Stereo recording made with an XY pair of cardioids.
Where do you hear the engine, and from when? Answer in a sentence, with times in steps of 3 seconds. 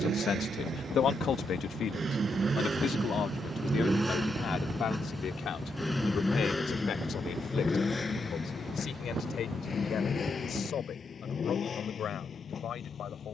In this clip you hear the engine on the right from 0 s, in the centre from 3 s and on the left from 6 s.